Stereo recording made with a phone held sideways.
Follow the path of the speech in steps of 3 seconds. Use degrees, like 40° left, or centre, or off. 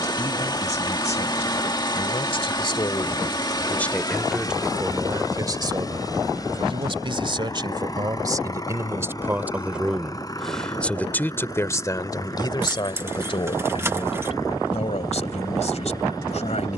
50° left, 10° right, 30° right, centre, 40° left, 60° left.